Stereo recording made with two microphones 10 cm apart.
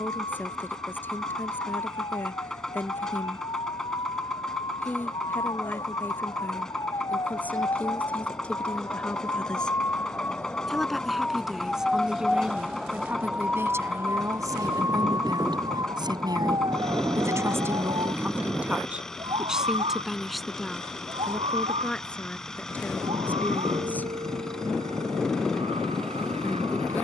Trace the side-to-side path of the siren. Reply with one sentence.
You can hear the siren move to the right.